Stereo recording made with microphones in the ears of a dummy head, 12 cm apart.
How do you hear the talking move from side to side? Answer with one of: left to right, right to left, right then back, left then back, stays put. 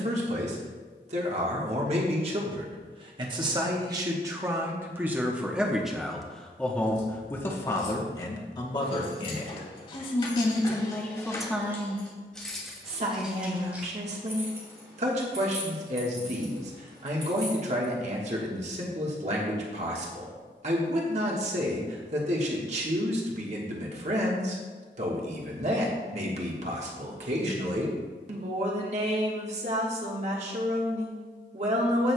left then back.